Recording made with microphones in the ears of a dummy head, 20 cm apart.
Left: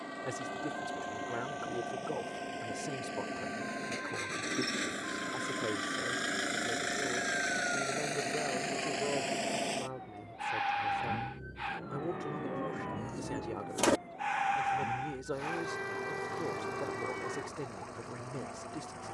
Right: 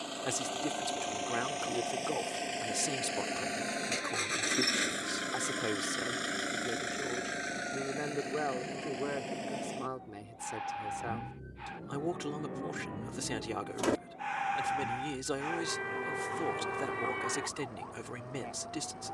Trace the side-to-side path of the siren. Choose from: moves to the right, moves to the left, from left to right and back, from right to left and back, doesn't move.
moves to the right.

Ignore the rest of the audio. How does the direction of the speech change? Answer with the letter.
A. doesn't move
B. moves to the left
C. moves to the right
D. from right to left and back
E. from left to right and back
A.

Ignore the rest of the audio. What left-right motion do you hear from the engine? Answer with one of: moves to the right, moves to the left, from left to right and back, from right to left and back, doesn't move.
moves to the left.